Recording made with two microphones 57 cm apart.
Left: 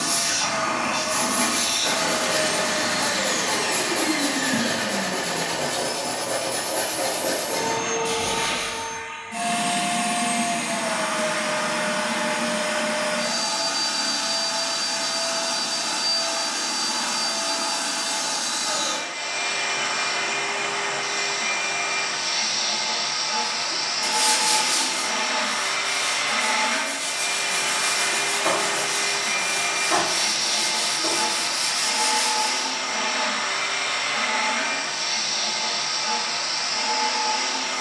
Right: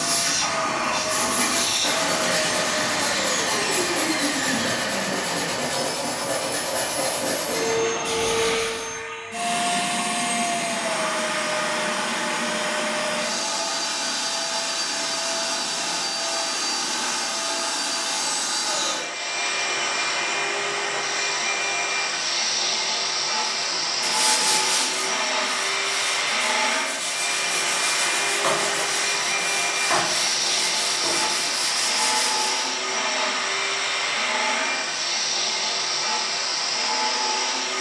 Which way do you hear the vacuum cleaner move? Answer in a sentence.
In this clip you hear the vacuum cleaner stay in one place.